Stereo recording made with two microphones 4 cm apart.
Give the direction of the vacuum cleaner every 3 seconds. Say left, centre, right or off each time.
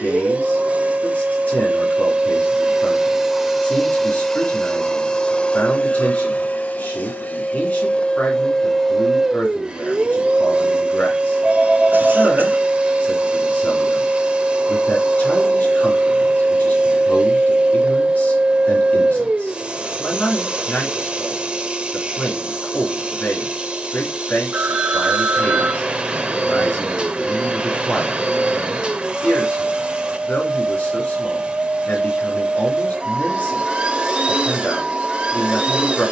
right, centre, left, right, right, right, right, right, right, right, right, right.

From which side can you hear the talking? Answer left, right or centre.
left.